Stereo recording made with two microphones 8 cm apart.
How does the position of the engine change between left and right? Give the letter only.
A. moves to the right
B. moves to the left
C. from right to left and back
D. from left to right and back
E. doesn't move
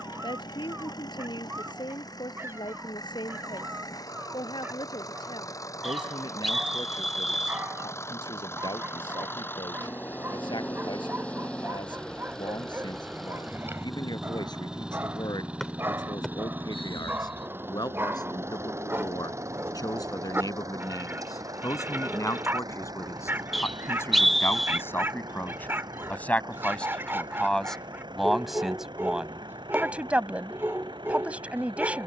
A.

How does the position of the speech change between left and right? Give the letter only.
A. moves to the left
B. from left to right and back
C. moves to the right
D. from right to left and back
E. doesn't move
C.